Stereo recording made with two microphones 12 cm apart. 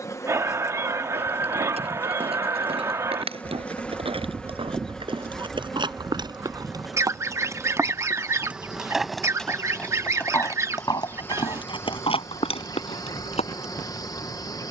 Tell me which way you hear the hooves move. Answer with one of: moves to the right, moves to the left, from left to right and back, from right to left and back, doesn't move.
moves to the left.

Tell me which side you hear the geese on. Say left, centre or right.
right.